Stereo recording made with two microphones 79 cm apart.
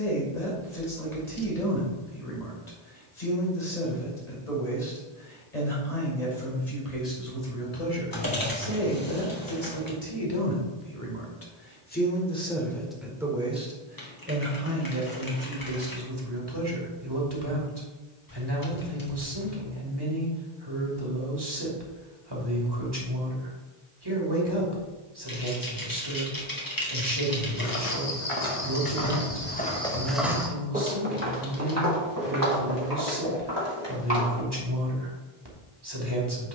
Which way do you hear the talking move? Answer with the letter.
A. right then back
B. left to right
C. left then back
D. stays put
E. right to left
B.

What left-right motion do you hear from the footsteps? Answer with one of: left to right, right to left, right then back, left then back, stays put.
left to right.